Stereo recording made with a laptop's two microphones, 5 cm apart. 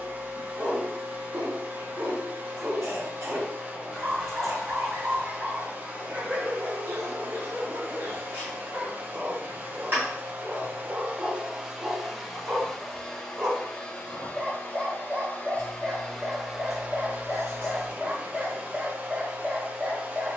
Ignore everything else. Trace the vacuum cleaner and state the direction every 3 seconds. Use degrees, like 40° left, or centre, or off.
30° right, 30° right, 30° right, 20° right, 10° left, centre, 30° right.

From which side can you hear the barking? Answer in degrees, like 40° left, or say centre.
40° right.